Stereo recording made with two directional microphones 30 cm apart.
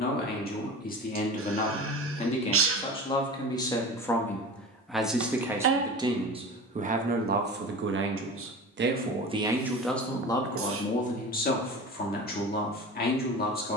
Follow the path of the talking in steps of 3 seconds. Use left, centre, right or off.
left, centre, right, centre, left.